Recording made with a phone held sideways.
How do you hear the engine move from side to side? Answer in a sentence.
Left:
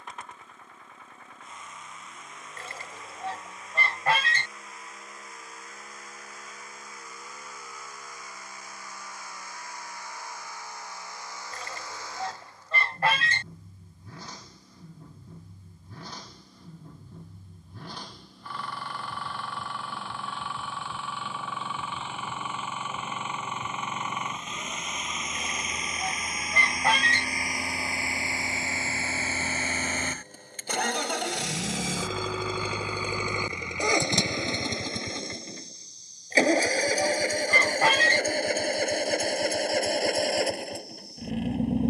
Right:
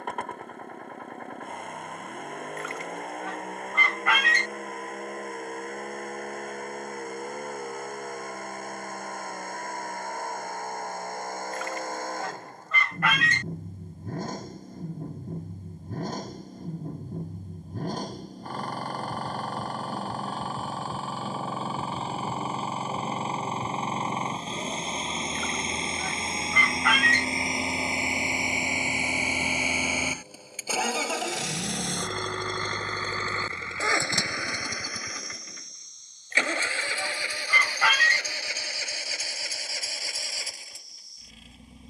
You can hear the engine travel towards the left.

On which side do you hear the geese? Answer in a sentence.
You can hear the geese on the left.